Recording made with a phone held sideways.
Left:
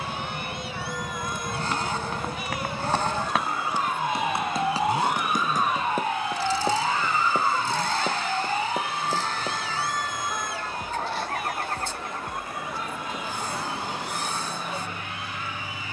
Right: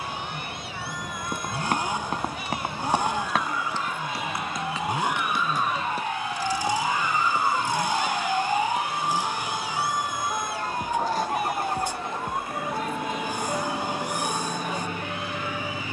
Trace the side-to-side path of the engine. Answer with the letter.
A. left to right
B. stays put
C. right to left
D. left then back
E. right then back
B.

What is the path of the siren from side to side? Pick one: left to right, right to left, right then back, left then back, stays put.
left to right.